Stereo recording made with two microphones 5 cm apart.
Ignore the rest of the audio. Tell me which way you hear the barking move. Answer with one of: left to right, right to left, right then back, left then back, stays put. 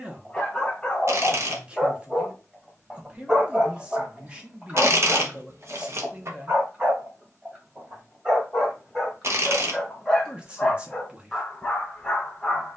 right then back.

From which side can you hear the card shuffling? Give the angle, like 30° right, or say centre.
60° right.